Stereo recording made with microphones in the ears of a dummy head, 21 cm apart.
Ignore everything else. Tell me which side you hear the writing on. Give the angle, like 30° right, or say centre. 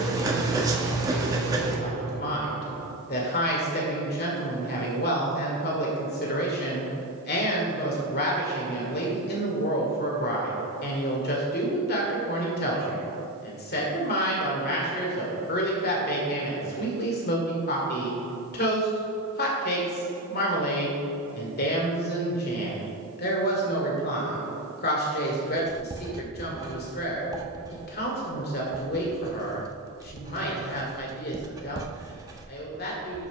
20° right.